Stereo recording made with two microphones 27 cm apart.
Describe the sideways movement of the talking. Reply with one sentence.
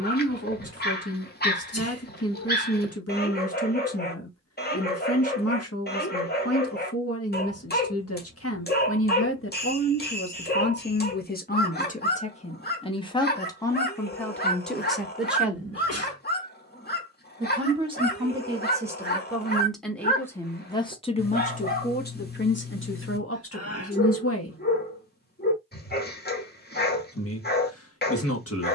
You can hear the talking move from left to right and back again.